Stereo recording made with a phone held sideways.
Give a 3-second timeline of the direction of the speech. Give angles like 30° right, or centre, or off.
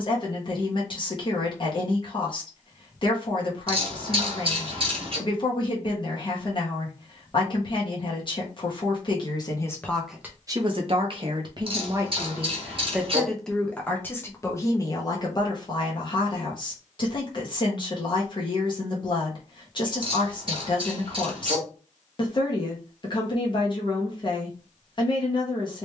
40° left, 40° left, 40° left, 10° right, 10° left, 40° left, 40° left, 40° left, 40° left.